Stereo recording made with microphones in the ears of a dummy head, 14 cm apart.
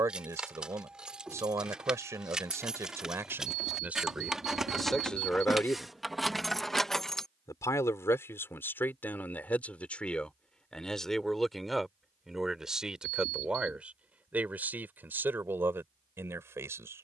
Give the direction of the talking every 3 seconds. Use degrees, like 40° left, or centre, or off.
20° right, centre, 20° left, 10° left, 10° right, 10° right.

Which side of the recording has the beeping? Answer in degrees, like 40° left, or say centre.
60° right.